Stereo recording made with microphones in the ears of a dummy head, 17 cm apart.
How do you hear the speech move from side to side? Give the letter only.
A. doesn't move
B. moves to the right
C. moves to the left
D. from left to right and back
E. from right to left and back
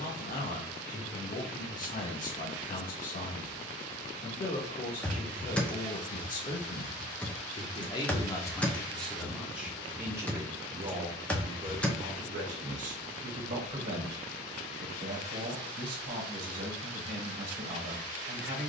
B.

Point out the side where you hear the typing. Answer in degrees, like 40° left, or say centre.
10° left.